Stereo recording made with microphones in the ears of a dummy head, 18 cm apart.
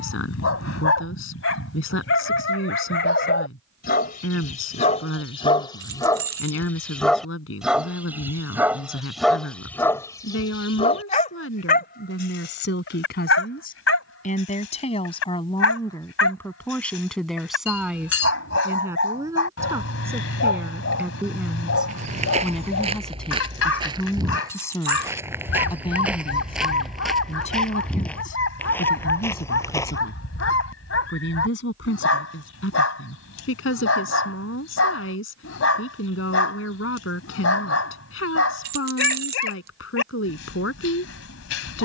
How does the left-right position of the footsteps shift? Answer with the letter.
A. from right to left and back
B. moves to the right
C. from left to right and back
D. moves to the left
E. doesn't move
D.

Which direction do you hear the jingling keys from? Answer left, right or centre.
right.